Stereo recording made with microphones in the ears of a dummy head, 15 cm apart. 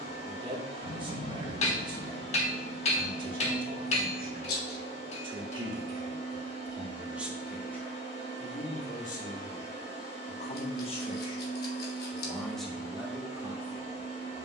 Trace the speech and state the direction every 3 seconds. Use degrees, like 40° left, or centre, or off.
30° right, 30° right, centre, 40° left, 10° right.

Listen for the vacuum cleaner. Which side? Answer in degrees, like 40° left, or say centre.
40° left.